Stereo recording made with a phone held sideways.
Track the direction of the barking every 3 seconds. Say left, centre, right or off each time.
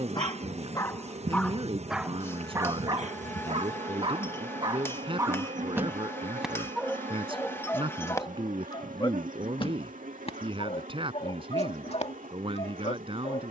centre, right, centre, left, left.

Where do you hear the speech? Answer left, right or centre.
right.